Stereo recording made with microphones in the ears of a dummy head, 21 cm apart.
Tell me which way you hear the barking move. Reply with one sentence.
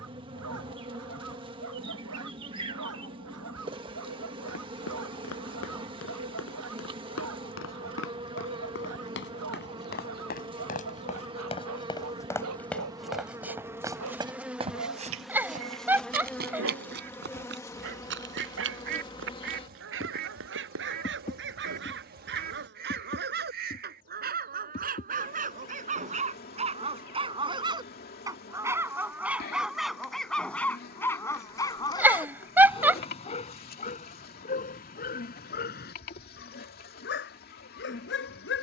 You can hear the barking move from right to left.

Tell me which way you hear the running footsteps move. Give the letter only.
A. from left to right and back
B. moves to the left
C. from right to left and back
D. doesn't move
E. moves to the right
E.